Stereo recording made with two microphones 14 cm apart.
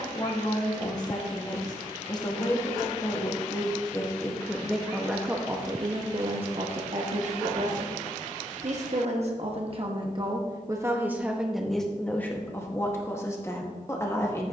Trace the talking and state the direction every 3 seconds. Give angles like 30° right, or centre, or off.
30° left, centre, 50° right, 30° right, 20° left.